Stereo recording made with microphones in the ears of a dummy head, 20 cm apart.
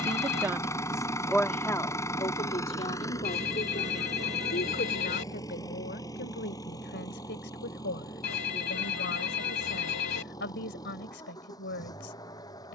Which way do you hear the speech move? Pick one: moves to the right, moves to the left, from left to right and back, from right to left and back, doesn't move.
moves to the left.